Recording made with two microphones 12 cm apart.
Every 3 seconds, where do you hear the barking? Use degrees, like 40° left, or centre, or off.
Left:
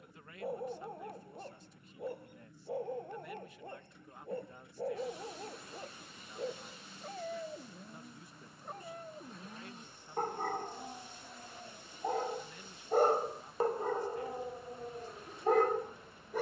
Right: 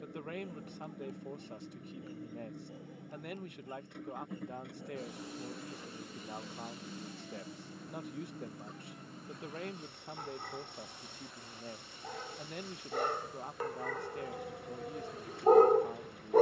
60° left, 60° left, 60° left, 50° left, 30° left, 30° right.